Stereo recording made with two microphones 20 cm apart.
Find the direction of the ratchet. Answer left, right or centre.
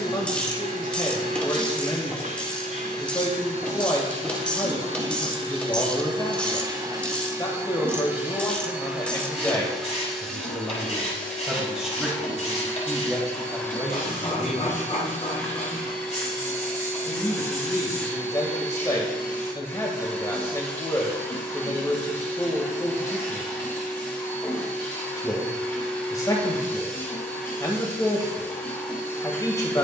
centre.